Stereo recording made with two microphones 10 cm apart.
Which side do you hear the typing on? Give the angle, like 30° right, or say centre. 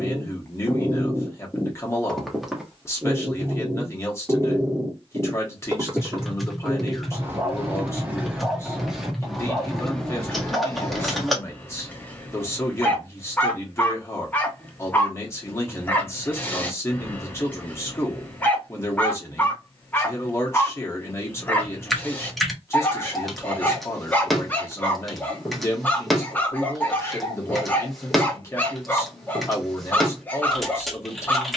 centre.